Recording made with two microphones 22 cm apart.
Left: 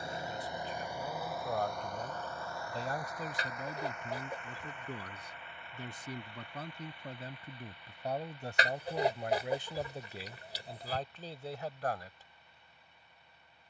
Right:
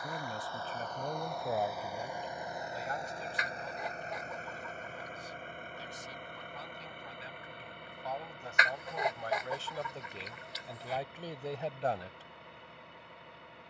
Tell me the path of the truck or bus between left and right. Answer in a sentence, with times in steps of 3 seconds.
You can hear the truck or bus in the centre from 0 s and on the right from 3 s.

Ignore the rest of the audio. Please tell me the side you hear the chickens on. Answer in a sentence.
You can hear the chickens on the left.